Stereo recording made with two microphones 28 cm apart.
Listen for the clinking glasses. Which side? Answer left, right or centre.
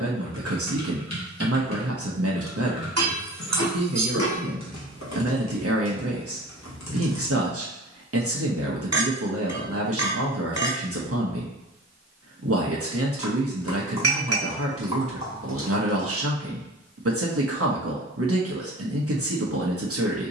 right.